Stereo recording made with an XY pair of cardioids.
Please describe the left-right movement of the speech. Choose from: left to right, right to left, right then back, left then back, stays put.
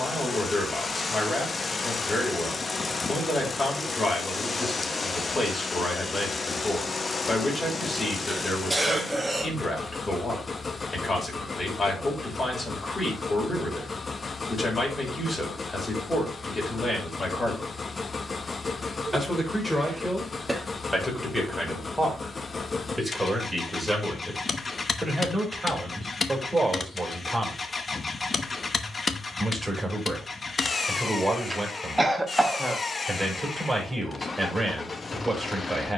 left to right.